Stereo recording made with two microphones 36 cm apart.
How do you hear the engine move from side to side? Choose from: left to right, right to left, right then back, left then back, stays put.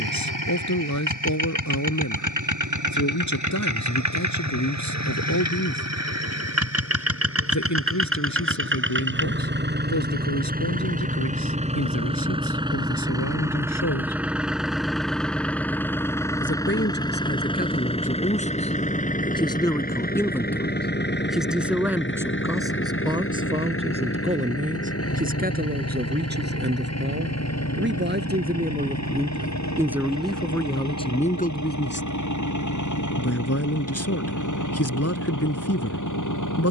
right to left.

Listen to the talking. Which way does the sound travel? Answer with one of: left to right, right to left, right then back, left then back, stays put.
right then back.